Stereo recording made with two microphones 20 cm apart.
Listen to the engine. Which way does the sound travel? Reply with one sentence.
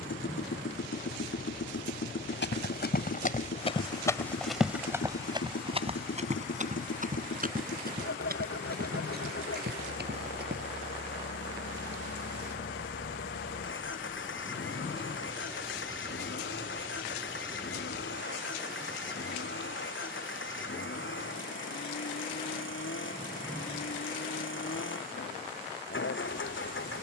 In this clip you hear the engine stay in one place.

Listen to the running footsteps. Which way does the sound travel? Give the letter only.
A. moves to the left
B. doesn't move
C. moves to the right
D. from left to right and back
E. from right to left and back
C.